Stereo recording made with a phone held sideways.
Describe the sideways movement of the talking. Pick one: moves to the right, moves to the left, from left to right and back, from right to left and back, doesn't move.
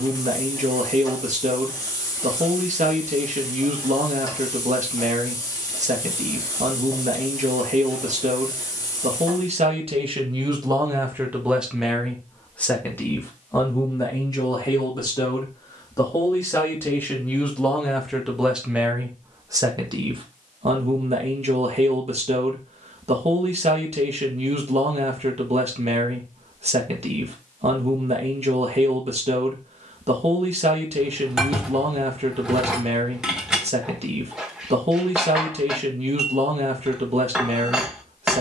from right to left and back.